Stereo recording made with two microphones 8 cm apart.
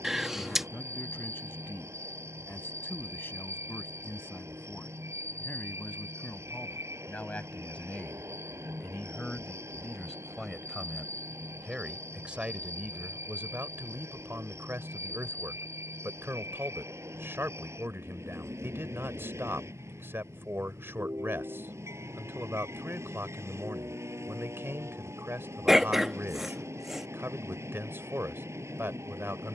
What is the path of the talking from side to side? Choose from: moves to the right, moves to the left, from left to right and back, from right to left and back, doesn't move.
moves to the right.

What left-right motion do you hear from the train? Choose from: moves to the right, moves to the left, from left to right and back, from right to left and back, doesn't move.
doesn't move.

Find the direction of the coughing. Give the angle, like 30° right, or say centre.
centre.